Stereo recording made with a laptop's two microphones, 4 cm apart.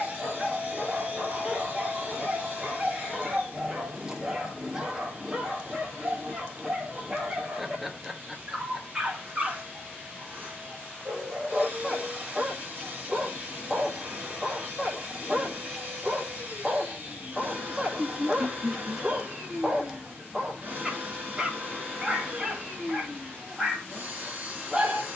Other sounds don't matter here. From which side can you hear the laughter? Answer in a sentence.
In this clip you hear the laughter in the centre.